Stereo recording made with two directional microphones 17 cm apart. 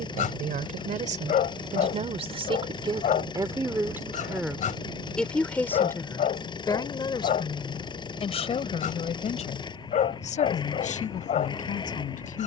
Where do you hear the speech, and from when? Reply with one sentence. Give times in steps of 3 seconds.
You can hear the speech on the right from 0 s, in the centre from 3 s and on the left from 6 s.